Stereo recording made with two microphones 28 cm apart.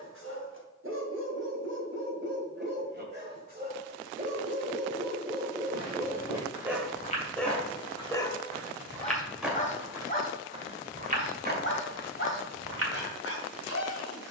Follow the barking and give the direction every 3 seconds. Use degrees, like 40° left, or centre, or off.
50° right, 30° right, centre, 30° left, 50° left.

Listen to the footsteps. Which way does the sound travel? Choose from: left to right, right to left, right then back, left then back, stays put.
left to right.